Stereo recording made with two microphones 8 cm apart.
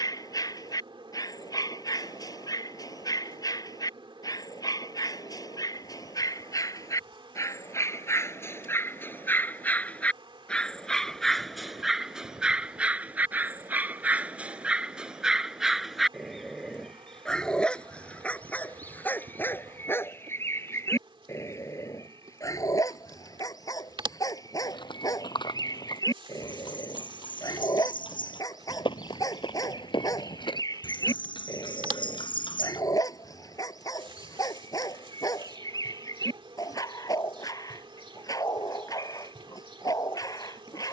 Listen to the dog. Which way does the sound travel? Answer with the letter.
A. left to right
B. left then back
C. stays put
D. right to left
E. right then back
E.